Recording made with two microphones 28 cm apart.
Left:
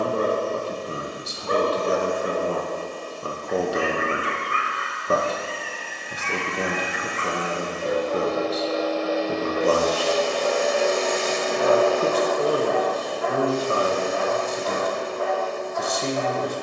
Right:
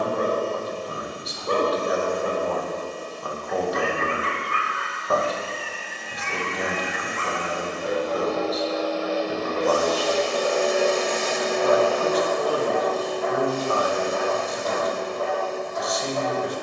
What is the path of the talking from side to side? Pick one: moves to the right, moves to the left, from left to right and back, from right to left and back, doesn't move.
doesn't move.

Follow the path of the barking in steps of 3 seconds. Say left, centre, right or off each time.
right, left, left, centre, right, right.